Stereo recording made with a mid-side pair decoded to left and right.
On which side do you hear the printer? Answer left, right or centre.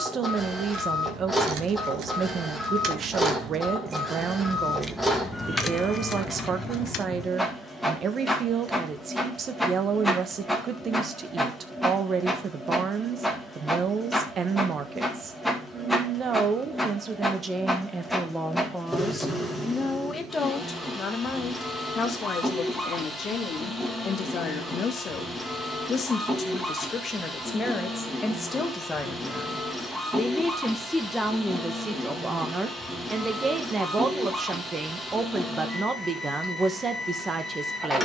centre.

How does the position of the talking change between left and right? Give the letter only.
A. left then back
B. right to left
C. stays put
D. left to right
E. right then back
A.